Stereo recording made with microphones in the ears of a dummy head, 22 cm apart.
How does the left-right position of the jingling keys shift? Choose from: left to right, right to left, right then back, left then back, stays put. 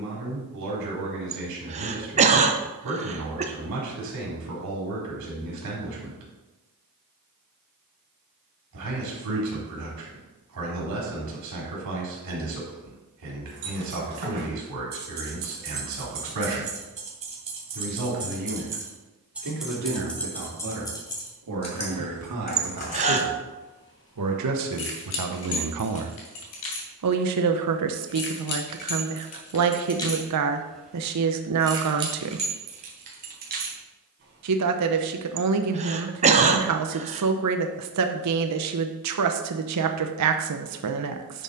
left then back.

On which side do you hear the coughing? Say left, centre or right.
right.